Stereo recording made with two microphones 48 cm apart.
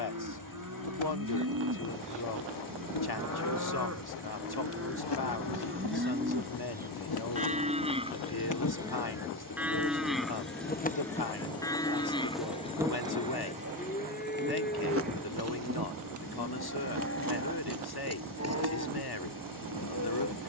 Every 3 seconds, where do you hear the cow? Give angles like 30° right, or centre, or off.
40° right, 30° right, 10° right, centre, 20° left, 30° left, 30° left.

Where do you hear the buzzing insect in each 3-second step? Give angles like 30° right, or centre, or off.
70° left, 60° left, 50° left, 20° left, 10° right, 40° right, 50° right.